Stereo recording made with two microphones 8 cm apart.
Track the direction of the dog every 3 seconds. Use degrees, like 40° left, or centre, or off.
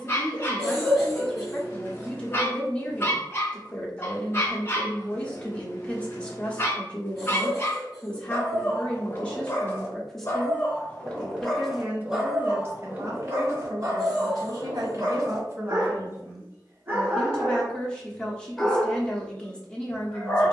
30° left, 30° left, 30° left, 20° left, 30° right, 30° right, 10° left.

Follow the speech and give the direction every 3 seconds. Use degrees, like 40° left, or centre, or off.
20° left, 20° left, 20° left, centre, 40° right, 10° right, 10° left.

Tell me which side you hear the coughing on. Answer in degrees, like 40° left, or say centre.
centre.